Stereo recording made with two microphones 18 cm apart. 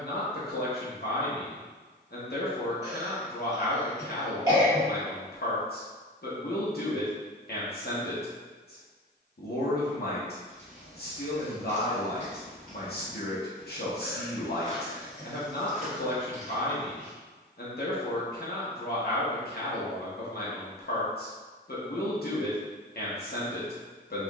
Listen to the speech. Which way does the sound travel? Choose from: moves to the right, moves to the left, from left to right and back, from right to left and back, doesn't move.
doesn't move.